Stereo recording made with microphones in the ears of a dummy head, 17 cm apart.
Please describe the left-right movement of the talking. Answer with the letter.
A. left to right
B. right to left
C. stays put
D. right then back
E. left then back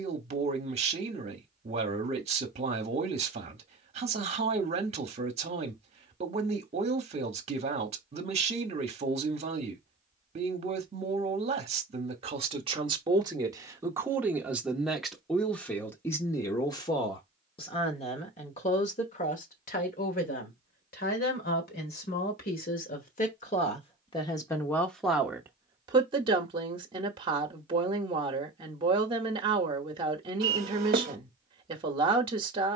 E.